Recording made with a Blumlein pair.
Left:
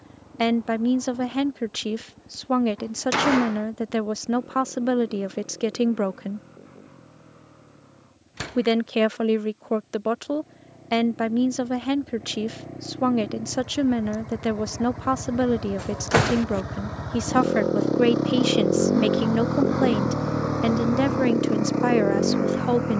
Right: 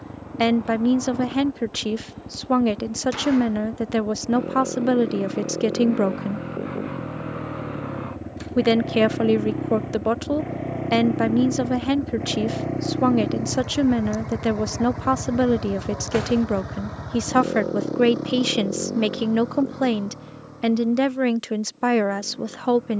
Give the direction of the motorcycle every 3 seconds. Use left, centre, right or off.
right, right, right, right, right, centre, left, left.